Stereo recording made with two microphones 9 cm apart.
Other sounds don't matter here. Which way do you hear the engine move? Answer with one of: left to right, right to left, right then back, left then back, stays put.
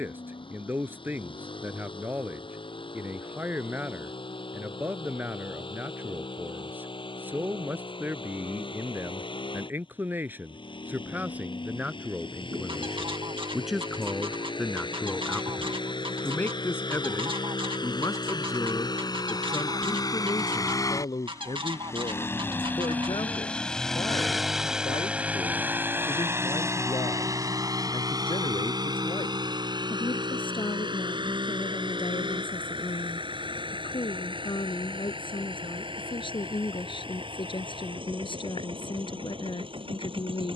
left to right.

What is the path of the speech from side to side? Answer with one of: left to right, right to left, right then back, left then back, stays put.
right to left.